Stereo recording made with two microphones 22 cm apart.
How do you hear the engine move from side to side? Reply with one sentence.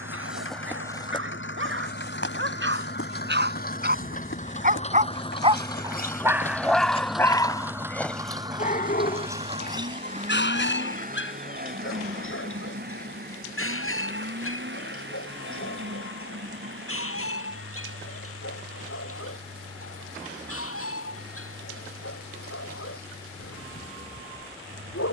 In this clip you hear the engine travel towards the right.